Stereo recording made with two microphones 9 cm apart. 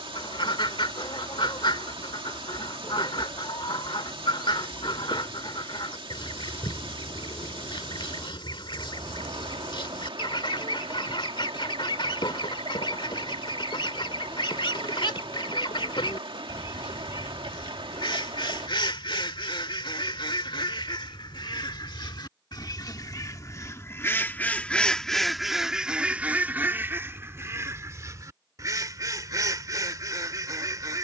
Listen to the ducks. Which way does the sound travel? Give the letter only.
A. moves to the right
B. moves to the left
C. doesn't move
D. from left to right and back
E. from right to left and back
A.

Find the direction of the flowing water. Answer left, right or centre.
right.